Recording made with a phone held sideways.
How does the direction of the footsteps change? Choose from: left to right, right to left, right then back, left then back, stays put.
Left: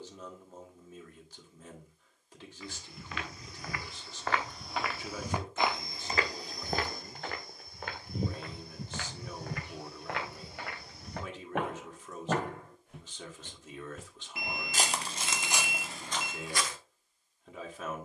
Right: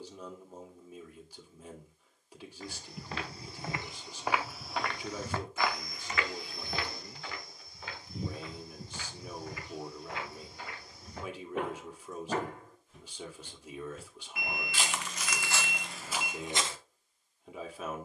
left then back.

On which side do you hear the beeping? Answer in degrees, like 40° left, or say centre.
30° left.